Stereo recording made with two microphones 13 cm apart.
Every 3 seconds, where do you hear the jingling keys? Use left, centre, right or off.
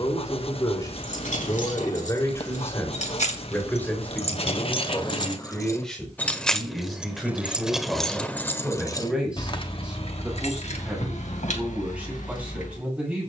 left, left, centre, left, left.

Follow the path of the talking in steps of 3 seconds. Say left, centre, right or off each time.
left, centre, centre, centre, centre.